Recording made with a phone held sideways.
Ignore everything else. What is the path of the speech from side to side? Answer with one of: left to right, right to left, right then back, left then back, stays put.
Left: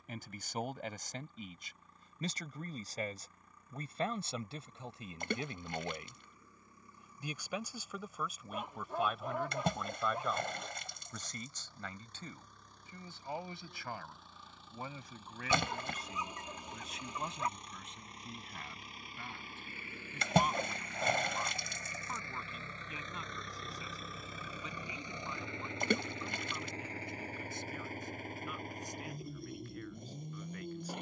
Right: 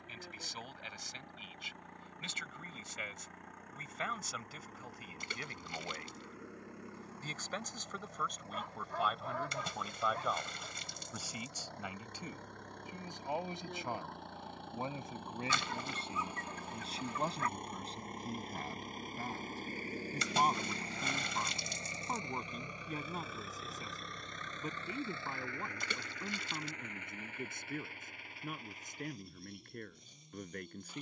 left to right.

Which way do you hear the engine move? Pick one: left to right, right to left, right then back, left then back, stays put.
right to left.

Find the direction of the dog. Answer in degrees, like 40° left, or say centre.
20° left.